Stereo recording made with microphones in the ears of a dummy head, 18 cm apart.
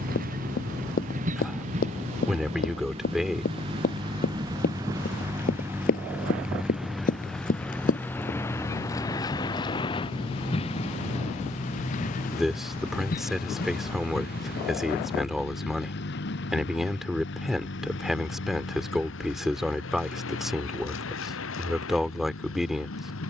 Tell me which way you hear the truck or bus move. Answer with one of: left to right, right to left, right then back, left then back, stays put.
right to left.